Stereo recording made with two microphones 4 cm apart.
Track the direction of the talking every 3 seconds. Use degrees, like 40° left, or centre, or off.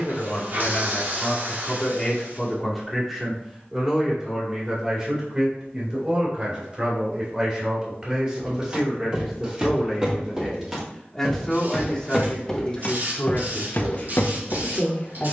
20° left, 20° right, 20° right, centre, 30° left.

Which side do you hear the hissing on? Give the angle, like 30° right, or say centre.
50° right.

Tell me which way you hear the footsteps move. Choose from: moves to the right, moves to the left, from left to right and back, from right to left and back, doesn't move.
moves to the left.